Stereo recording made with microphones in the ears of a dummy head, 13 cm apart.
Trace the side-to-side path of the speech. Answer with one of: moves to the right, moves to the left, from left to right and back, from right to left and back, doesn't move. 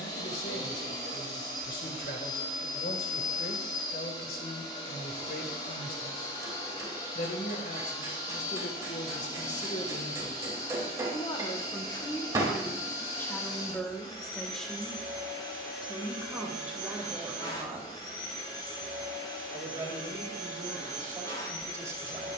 moves to the right.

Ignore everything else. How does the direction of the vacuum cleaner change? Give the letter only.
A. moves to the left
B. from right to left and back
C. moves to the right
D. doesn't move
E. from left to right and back
D.